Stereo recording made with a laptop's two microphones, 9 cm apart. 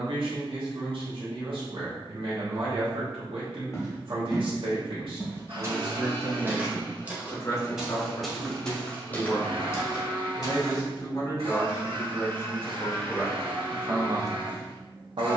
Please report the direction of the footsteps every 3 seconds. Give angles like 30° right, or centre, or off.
off, 10° right, 10° right, 30° left, off.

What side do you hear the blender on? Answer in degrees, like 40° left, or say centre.
90° right.